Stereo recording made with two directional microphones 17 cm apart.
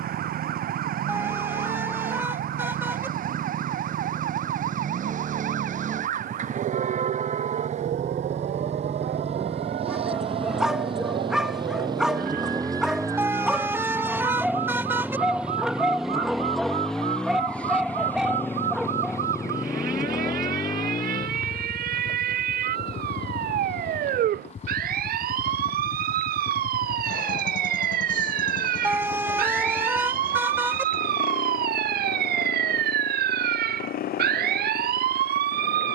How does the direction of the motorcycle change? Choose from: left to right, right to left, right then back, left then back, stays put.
right to left.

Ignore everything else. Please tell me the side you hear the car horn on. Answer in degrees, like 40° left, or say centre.
10° right.